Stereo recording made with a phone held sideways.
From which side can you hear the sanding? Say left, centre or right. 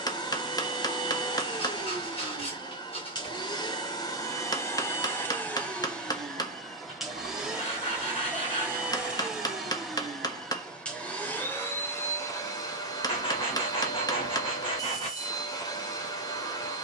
left.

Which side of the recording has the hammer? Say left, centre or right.
left.